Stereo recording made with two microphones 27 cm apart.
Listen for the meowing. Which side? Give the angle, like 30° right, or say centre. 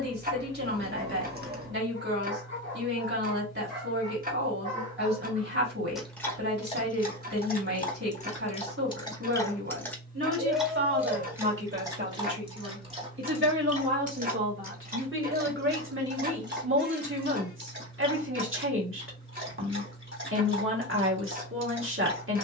40° right.